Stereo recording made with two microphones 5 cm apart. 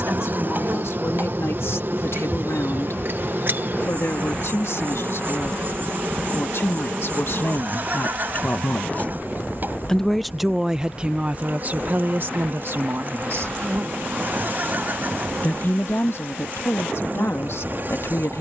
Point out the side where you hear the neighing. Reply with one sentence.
You can hear the neighing on the right.